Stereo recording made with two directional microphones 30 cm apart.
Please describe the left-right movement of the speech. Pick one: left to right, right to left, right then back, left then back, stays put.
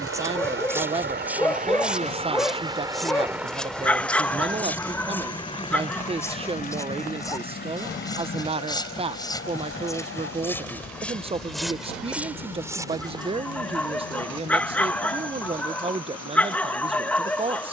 stays put.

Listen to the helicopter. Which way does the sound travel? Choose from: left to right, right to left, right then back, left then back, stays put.
right to left.